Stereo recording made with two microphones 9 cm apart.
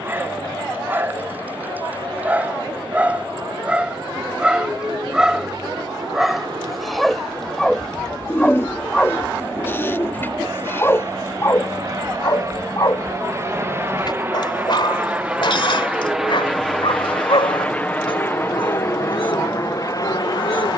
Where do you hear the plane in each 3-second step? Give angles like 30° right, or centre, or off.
60° right, 60° right, 50° right, 50° right, 30° right, centre, 30° left.